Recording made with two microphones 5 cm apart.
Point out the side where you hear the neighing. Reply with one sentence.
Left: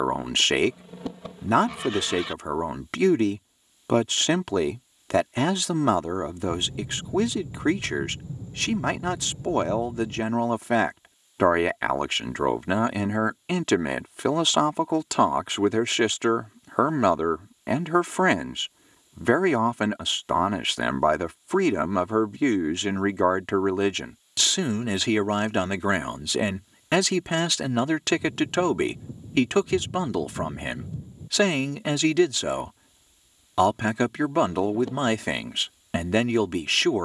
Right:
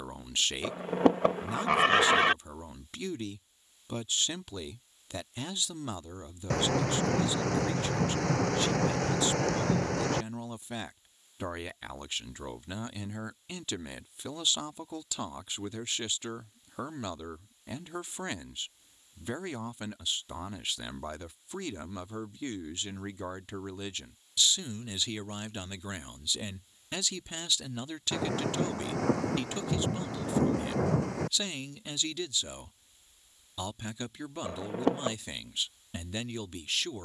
You can hear the neighing on the right.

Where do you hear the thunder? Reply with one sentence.
You can hear the thunder on the right.